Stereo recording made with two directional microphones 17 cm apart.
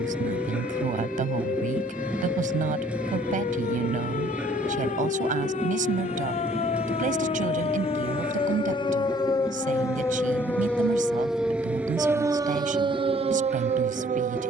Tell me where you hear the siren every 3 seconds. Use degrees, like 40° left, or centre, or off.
50° left, 50° left, 40° left, 10° left, 30° right.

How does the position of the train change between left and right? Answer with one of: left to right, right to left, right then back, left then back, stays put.
stays put.